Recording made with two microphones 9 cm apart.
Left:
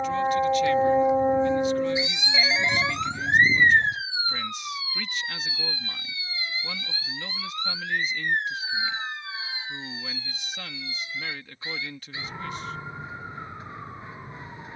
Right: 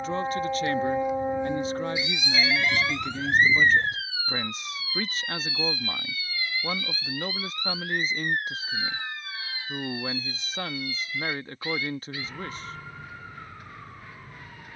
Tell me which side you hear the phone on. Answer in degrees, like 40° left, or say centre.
20° left.